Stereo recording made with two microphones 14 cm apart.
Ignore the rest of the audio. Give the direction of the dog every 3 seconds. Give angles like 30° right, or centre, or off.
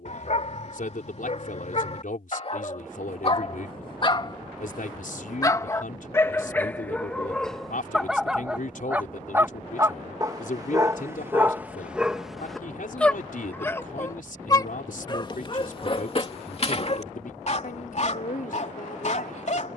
50° left, 30° left, centre, 20° right, 10° left, 40° left, 50° left.